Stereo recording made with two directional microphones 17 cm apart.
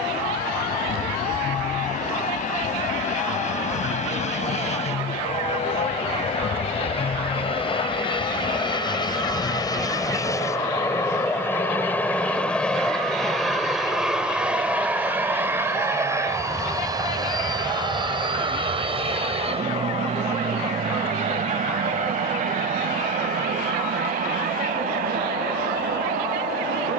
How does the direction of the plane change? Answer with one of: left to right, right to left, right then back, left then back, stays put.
left to right.